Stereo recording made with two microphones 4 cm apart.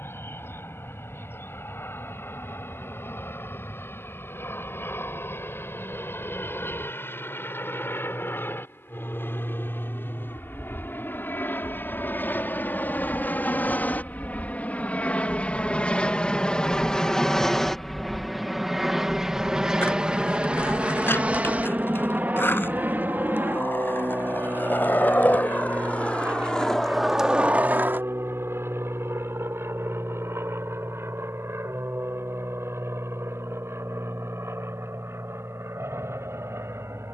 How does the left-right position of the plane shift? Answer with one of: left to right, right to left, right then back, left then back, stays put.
left to right.